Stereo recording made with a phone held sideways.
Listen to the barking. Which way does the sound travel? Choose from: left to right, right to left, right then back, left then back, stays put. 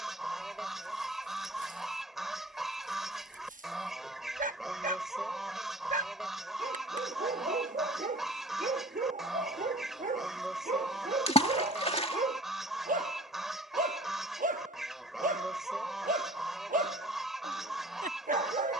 stays put.